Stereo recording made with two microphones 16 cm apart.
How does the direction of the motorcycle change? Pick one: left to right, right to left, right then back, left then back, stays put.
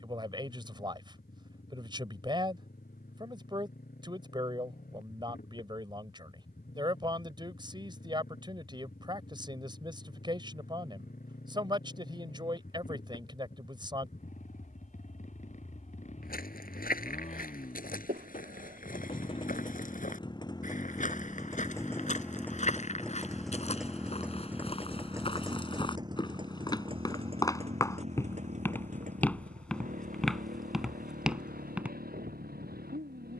left to right.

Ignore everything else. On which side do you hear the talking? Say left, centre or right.
right.